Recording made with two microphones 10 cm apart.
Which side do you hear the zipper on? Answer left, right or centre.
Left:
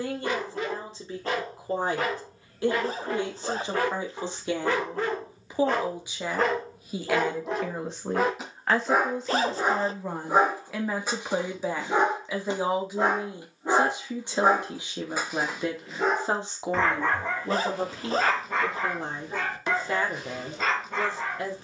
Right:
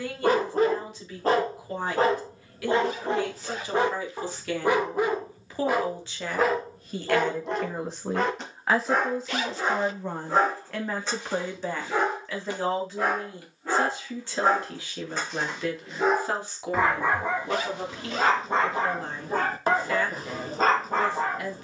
left.